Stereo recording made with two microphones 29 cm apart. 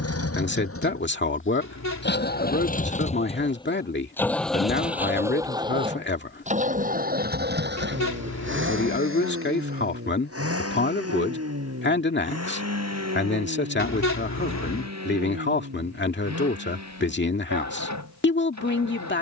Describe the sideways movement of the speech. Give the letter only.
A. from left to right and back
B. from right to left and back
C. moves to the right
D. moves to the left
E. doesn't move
E.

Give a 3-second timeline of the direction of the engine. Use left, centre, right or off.
left, centre, right, right, right, right, right.